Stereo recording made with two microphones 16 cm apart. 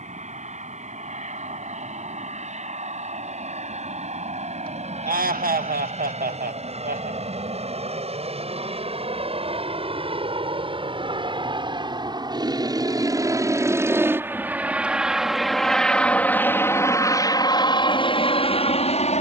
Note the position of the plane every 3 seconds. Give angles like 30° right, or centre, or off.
60° right, 50° right, 50° right, 40° right, 20° right, 10° left, 40° left.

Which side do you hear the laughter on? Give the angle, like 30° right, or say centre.
80° right.